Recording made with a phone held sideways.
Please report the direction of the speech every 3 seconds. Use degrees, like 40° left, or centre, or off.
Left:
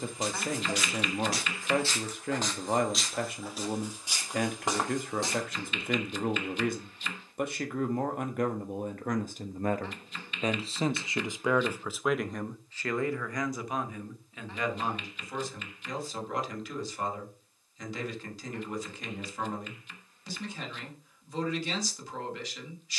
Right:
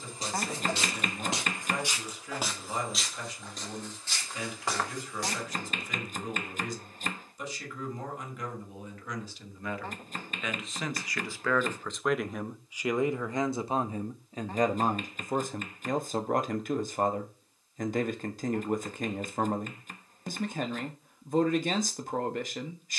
60° left, 60° left, 60° left, 30° left, 30° right, 50° right, 50° right, 50° right.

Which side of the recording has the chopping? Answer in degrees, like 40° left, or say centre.
50° right.